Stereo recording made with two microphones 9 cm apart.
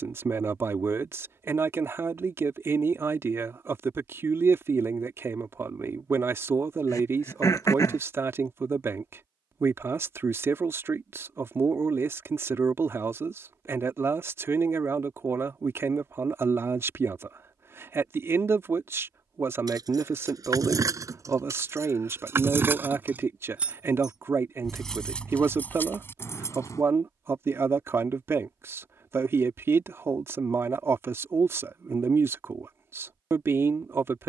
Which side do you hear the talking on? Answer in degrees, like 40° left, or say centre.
30° right.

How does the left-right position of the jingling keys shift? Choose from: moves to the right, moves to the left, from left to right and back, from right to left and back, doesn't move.
moves to the left.